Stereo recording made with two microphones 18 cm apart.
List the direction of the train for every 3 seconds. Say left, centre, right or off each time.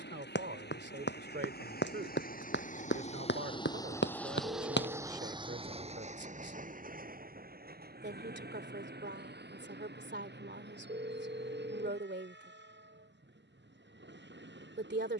left, centre, right, right, right.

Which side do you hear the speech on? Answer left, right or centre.
right.